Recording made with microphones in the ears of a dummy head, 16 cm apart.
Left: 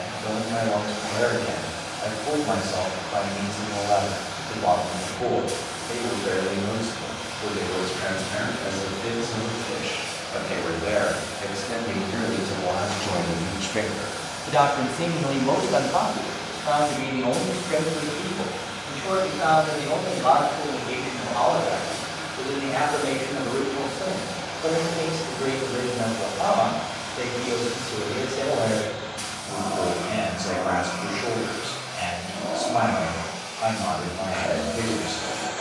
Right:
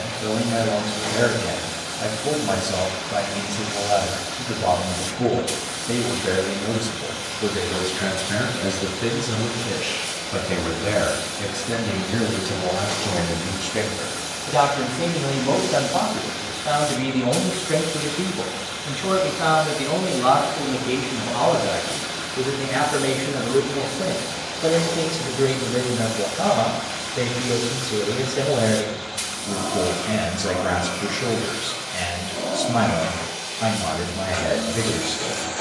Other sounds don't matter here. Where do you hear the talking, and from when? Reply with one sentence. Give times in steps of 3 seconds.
You can hear the talking on the right from 0 s, in the centre from 12 s and on the right from 15 s.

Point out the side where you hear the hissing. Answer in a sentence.
In this clip you hear the hissing on the right.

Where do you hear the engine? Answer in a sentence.
You can hear the engine on the right.